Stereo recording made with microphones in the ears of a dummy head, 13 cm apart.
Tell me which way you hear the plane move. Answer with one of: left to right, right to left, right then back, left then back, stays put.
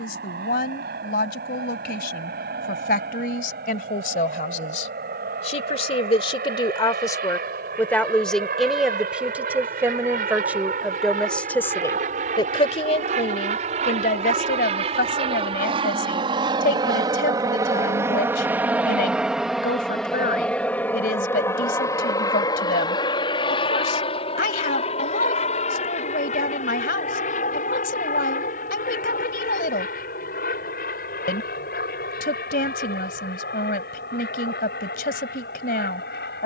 right to left.